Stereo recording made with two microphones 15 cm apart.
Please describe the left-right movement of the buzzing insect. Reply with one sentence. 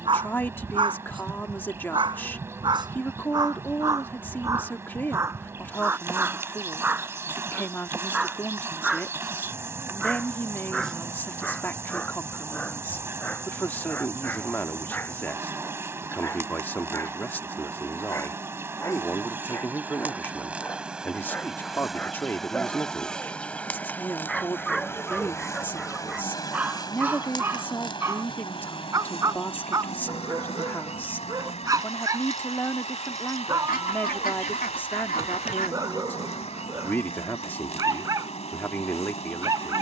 In this clip you hear the buzzing insect move to the left.